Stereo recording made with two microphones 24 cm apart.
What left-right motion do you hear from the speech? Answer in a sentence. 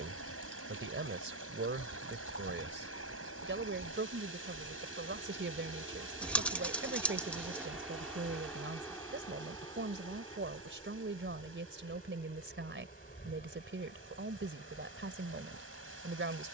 In this clip you hear the speech stay put.